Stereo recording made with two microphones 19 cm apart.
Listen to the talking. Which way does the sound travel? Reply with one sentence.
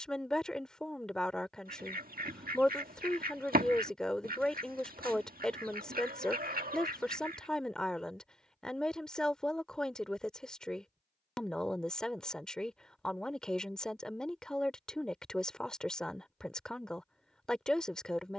You can hear the talking stay put.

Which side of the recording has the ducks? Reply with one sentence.
In this clip you hear the ducks on the right.